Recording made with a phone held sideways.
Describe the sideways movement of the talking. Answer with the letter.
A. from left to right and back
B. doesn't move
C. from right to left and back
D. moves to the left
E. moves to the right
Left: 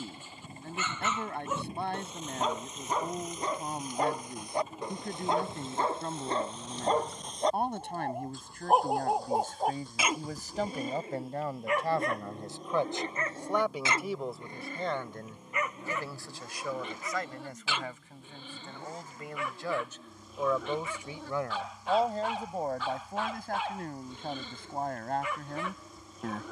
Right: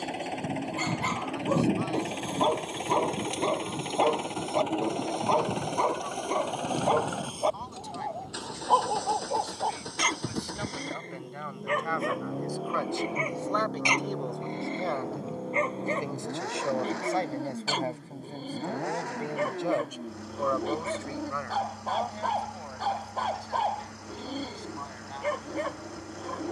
A.